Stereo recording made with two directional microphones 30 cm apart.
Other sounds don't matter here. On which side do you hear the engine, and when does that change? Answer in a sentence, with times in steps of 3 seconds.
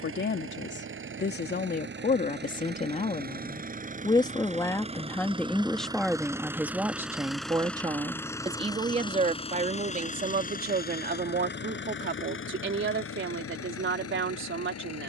You can hear the engine on the right from 0 s, in the centre from 6 s and on the left from 9 s.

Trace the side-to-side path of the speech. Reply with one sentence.
In this clip you hear the speech move from left to right.